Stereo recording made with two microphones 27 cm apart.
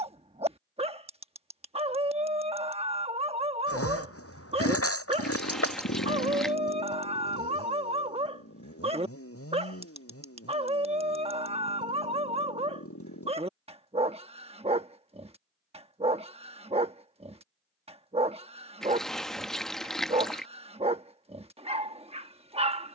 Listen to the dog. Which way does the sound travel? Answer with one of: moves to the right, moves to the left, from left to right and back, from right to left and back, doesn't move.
doesn't move.